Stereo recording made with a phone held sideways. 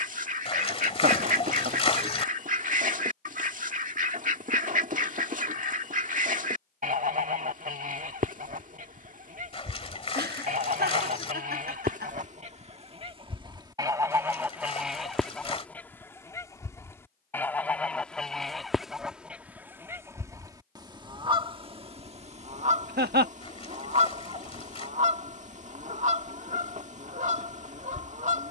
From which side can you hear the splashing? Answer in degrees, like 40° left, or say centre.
40° left.